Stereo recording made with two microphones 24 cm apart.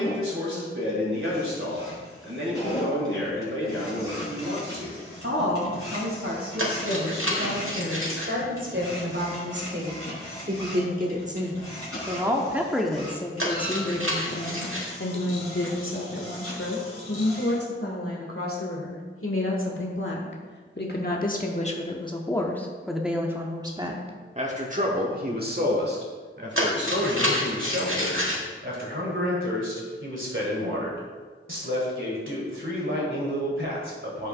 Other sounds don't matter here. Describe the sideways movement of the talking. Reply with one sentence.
In this clip you hear the talking move from right to left and back again.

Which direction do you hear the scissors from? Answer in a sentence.
You can hear the scissors on the right.